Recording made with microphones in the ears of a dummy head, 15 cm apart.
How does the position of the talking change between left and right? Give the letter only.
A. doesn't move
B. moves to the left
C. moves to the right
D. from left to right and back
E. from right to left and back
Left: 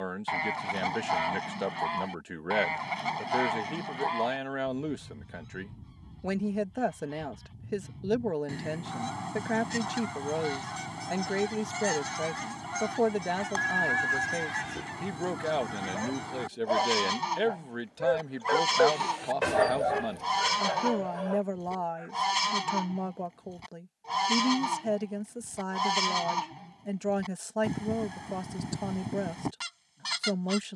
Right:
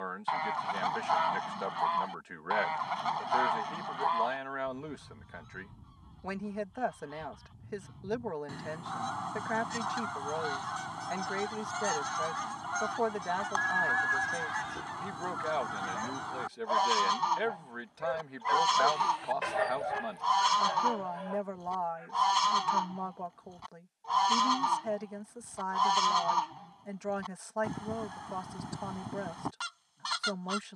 A.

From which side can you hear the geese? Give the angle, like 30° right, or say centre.
20° left.